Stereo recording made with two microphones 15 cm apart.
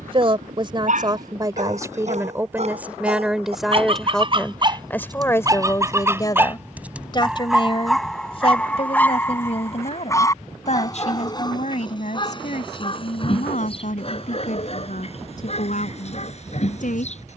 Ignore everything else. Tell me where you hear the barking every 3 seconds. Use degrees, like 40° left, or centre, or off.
50° right, 30° right, centre, 20° left, 40° left, 50° left.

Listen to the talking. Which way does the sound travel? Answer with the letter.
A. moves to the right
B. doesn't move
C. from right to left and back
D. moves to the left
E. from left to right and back
D.